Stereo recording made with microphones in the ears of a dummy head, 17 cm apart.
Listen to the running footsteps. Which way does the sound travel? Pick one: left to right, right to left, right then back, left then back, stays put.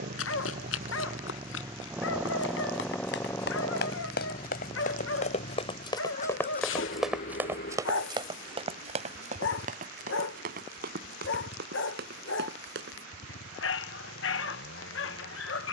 left to right.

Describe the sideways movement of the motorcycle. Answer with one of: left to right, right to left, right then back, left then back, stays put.
right to left.